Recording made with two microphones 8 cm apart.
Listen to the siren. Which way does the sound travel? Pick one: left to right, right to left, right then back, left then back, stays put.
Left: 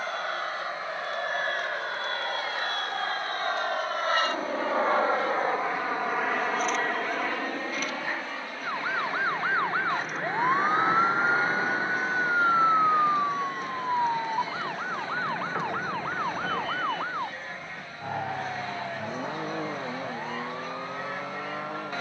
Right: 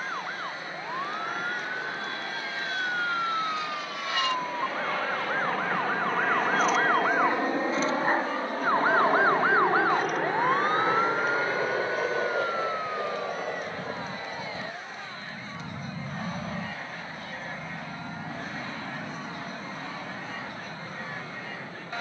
right to left.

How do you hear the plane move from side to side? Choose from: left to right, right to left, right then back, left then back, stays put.
left to right.